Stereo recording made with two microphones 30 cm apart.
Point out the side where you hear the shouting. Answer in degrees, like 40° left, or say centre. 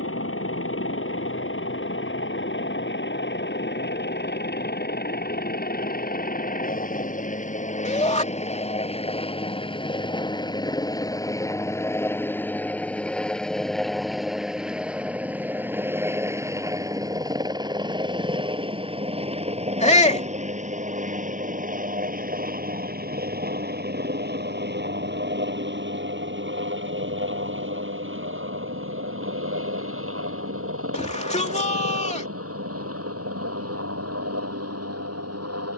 20° left.